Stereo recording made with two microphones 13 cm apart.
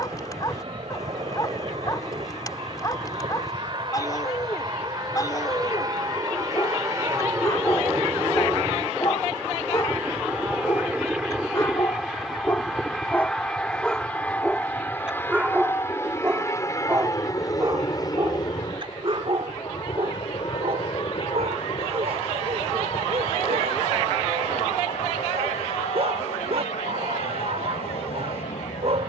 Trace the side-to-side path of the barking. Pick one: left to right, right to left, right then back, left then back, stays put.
left to right.